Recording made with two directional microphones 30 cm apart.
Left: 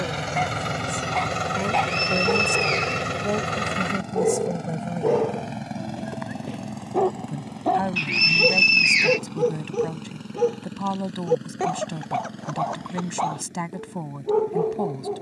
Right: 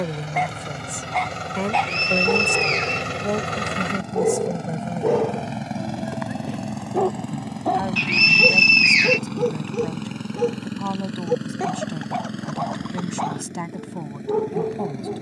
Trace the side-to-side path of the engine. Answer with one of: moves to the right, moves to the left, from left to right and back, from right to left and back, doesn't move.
moves to the right.